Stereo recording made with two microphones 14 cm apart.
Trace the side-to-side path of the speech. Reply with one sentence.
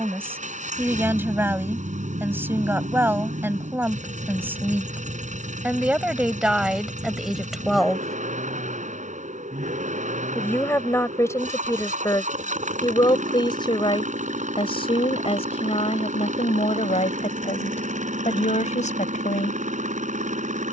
You can hear the speech travel towards the left.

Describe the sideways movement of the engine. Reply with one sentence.
In this clip you hear the engine stay in one place.